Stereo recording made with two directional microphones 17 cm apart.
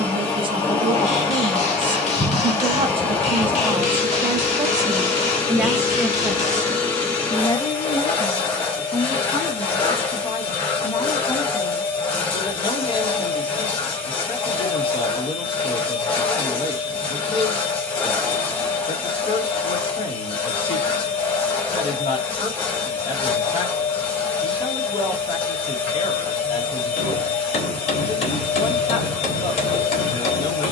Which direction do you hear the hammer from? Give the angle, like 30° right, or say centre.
40° left.